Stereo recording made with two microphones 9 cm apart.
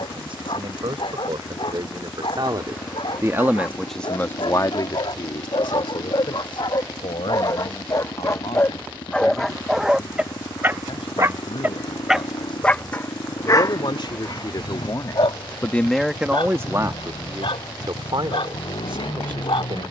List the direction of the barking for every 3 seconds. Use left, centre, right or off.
left, left, left, centre, left, left, left.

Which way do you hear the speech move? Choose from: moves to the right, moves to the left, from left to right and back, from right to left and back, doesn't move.
from right to left and back.